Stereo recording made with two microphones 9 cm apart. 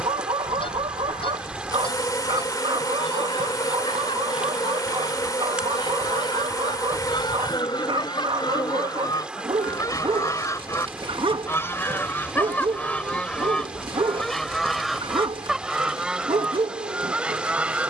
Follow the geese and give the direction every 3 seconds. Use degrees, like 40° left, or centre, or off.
70° left, 70° left, 60° left, 40° left, 10° left, 10° right.